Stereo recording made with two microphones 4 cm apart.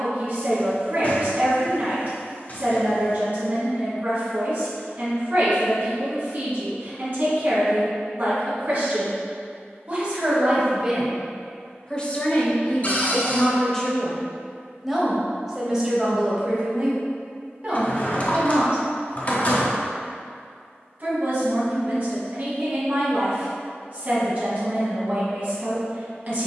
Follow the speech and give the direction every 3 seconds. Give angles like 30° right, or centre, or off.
40° right, 40° right, 40° right, 20° right, 20° left, 20° right, 30° right, 40° right, 40° right.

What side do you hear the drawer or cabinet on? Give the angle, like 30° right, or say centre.
40° left.